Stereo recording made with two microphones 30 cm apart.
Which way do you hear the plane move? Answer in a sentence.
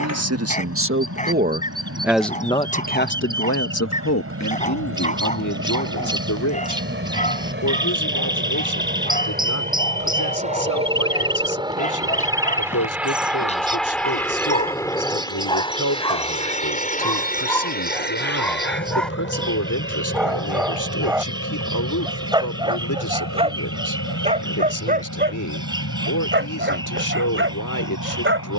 In this clip you hear the plane go from the right side to the left.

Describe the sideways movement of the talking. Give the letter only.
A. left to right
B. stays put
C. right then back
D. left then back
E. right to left
E.